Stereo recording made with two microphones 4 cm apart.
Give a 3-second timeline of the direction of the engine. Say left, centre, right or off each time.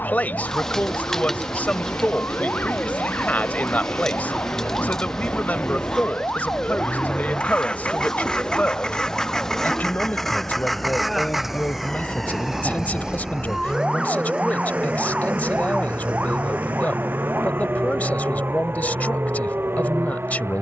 left, left, left, centre, right, right, right.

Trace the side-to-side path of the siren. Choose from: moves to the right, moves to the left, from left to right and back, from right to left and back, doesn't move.
moves to the right.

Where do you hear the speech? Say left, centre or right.
left.